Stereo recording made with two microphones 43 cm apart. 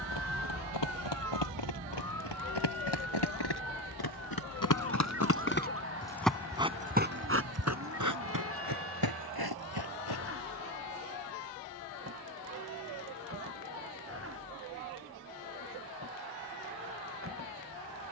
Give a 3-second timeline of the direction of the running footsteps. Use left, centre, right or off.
left, left, right, right, off, off.